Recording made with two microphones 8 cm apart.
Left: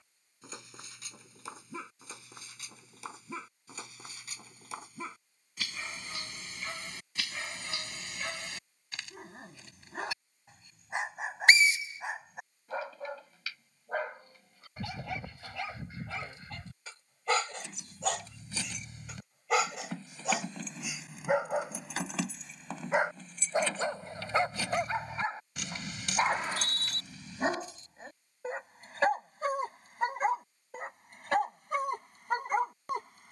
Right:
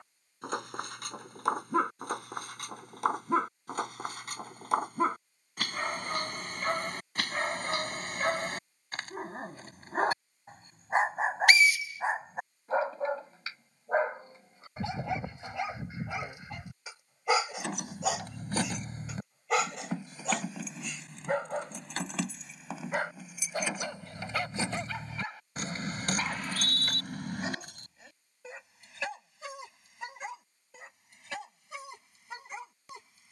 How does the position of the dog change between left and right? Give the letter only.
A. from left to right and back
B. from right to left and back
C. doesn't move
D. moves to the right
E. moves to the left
E.